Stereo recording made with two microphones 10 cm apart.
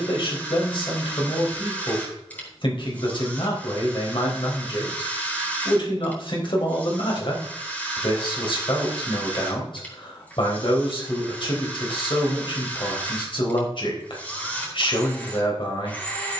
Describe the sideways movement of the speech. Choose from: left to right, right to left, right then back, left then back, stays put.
stays put.